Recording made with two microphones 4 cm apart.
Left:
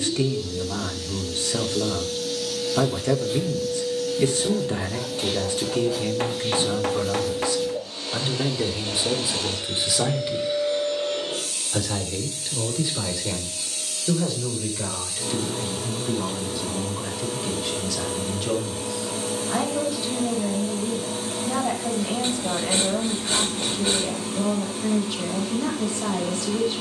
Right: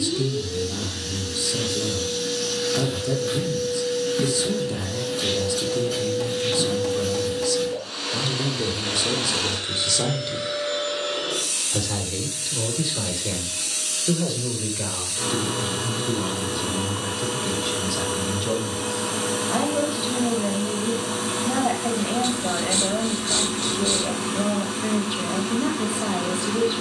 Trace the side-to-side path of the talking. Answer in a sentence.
In this clip you hear the talking move from left to right.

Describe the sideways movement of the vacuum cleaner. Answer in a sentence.
In this clip you hear the vacuum cleaner stay put.